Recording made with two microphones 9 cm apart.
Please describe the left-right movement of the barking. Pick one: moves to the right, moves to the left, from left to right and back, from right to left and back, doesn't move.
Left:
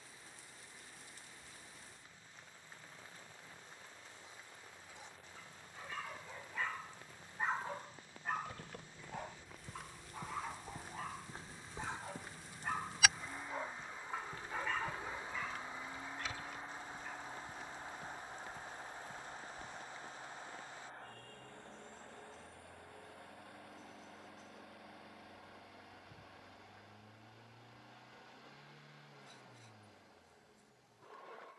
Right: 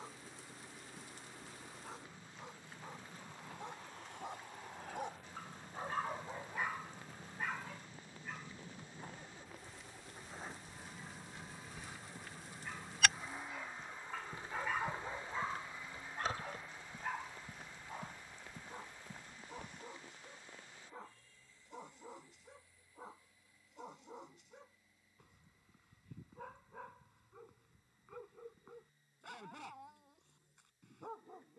from right to left and back.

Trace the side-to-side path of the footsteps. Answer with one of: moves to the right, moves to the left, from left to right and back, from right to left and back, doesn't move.
moves to the right.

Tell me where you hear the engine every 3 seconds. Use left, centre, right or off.
right, right, right, right, centre, left, left, left, left, left, left.